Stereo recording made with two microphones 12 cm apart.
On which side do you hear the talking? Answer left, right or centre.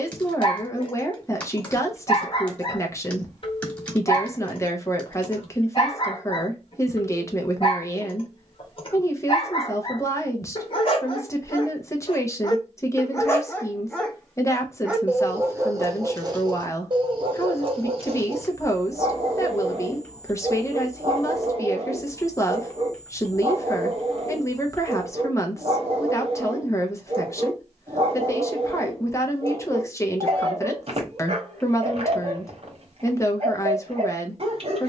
left.